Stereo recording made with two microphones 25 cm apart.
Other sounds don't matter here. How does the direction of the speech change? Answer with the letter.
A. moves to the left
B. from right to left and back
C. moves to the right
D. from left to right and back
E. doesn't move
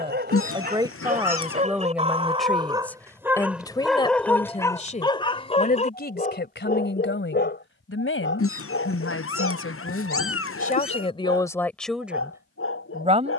B.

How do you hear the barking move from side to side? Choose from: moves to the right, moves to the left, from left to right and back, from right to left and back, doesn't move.
moves to the left.